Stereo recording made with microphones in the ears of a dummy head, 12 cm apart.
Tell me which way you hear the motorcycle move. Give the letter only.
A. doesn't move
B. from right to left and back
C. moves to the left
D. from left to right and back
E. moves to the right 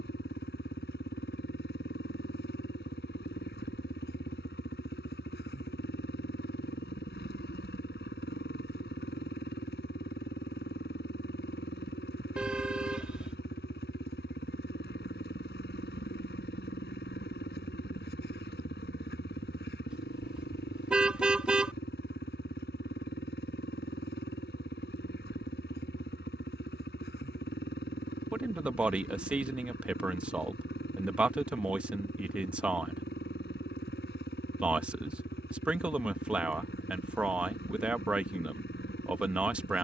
A.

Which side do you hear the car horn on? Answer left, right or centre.
centre.